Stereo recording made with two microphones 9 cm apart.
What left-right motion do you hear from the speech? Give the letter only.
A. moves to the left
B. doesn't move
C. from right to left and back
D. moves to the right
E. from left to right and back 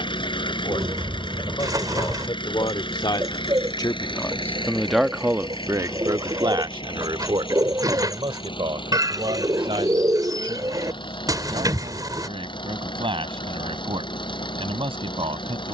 D.